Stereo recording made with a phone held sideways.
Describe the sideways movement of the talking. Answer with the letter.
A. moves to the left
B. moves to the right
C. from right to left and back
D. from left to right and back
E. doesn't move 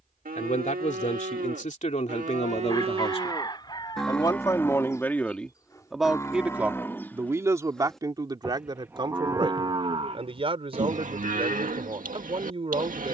B.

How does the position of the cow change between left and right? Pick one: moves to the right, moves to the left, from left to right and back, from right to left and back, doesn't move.
from right to left and back.